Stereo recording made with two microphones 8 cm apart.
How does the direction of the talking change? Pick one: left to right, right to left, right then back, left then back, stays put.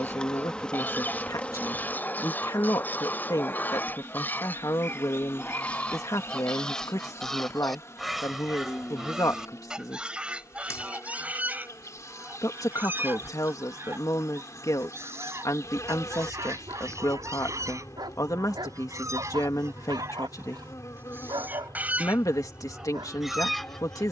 stays put.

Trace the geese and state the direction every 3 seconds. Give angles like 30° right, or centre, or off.
20° left, 20° left, centre, 10° right, 30° right, 40° right, 40° right, 10° right.